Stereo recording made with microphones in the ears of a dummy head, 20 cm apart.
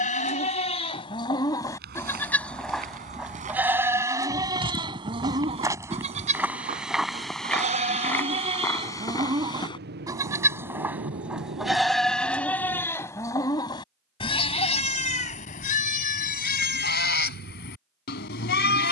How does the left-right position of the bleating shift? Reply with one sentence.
In this clip you hear the bleating move from left to right and back again.